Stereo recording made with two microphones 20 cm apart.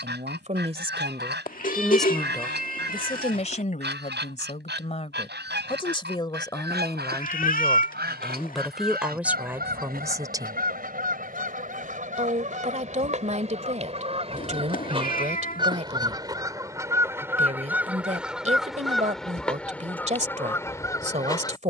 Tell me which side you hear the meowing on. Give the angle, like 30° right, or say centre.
40° left.